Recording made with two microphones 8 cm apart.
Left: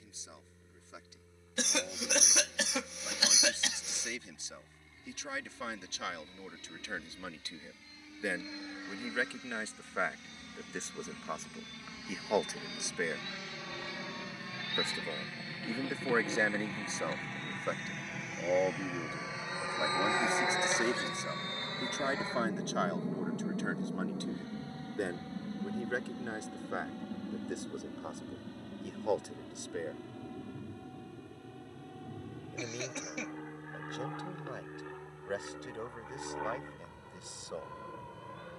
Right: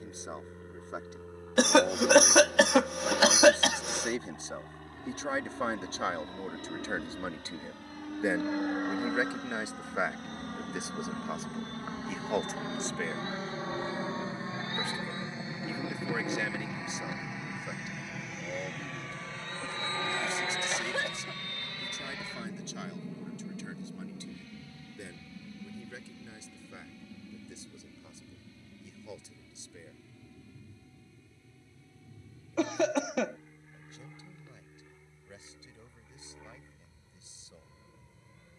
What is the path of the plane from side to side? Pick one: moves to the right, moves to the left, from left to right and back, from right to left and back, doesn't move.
moves to the left.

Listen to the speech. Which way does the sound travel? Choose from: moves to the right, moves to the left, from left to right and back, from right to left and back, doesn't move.
moves to the left.